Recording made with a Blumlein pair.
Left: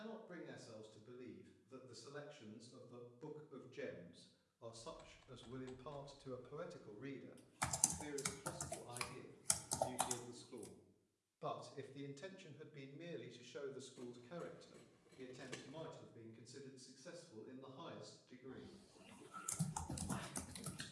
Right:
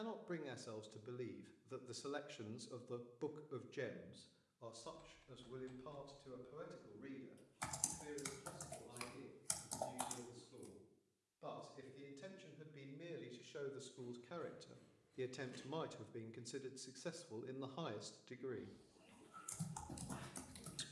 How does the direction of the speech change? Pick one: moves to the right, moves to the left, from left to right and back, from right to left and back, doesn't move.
from right to left and back.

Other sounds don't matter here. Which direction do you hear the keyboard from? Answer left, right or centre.
left.